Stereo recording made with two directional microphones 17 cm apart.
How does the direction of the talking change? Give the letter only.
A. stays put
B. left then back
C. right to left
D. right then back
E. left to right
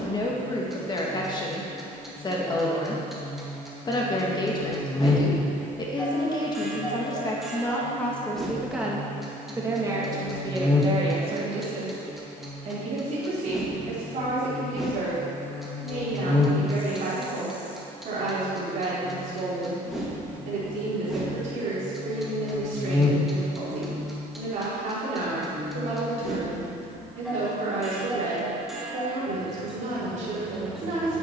E.